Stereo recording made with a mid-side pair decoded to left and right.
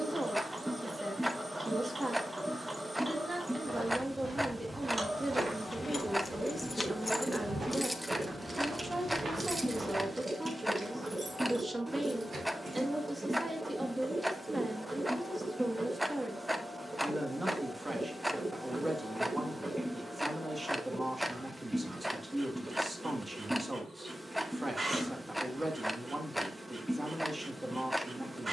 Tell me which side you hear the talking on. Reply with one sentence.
In this clip you hear the talking on the right.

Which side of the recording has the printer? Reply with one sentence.
You can hear the printer on the right.